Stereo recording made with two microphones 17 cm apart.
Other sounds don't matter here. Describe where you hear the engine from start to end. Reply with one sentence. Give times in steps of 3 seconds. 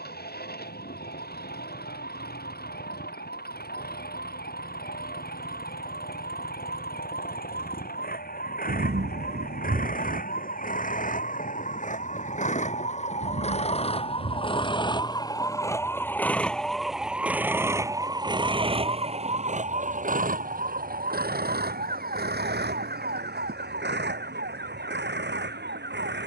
In this clip you hear the engine on the left from 0 s, in the centre from 15 s and on the right from 18 s.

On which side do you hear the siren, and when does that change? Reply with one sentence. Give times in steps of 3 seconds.
In this clip you hear the siren on the left from 0 s, in the centre from 15 s and on the right from 18 s.